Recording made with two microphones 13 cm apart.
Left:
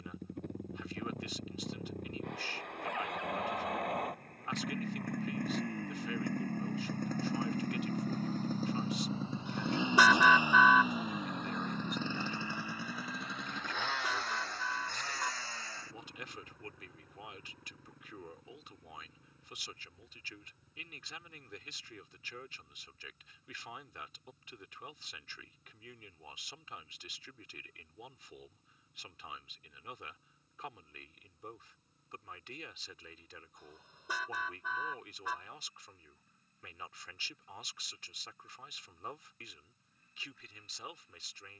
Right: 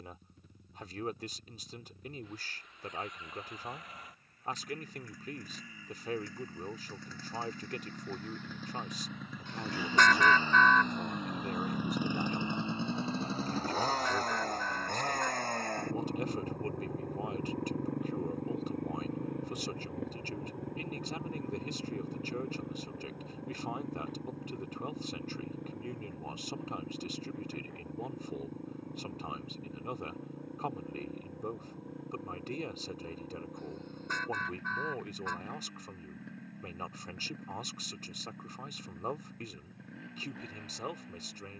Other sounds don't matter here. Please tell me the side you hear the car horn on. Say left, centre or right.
centre.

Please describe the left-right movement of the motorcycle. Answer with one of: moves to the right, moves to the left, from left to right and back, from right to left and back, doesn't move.
moves to the right.